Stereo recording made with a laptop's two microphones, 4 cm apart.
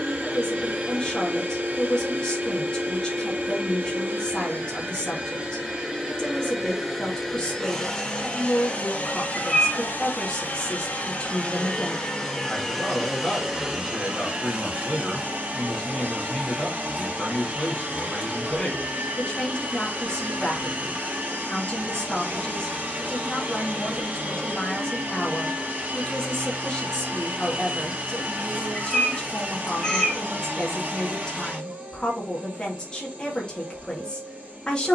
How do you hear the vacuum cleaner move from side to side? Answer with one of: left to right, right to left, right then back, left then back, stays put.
left then back.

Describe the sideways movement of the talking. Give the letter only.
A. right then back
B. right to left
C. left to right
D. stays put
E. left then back
D.